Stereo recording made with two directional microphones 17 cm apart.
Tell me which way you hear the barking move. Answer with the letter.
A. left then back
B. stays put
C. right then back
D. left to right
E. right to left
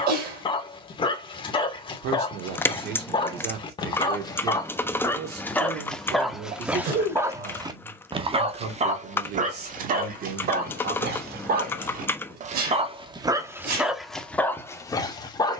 C.